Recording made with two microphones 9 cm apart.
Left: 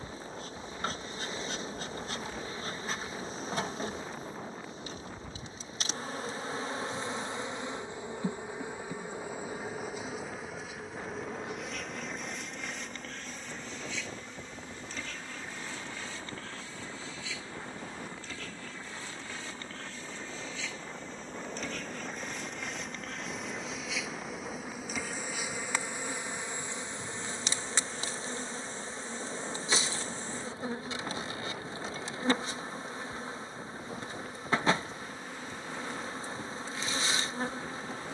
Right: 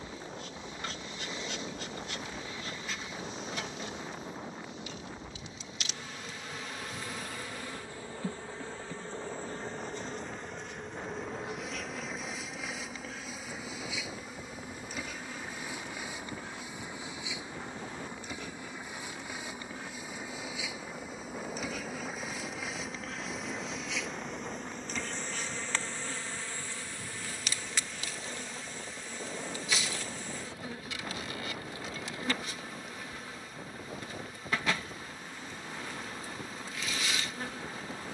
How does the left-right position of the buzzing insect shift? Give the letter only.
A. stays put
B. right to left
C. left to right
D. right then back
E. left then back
D.